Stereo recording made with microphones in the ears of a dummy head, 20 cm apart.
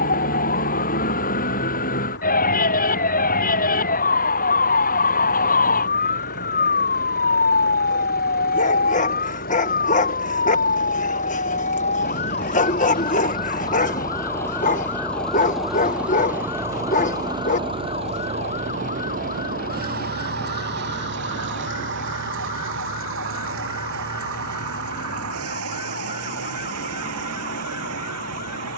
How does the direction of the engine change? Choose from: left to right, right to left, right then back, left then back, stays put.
left to right.